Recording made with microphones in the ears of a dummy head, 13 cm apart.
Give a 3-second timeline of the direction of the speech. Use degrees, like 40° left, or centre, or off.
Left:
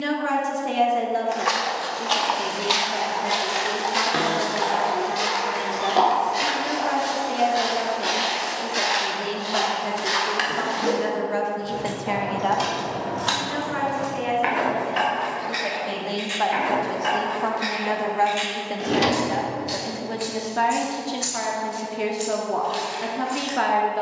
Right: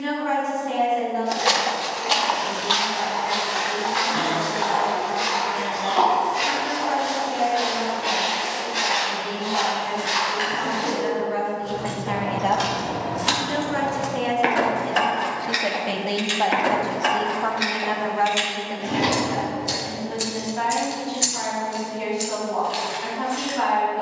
70° left, 70° left, 70° left, 60° left, 30° right, 10° right, 50° left, 70° left.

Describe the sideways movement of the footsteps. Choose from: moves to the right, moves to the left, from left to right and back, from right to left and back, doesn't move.
moves to the left.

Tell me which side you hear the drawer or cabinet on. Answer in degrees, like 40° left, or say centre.
70° left.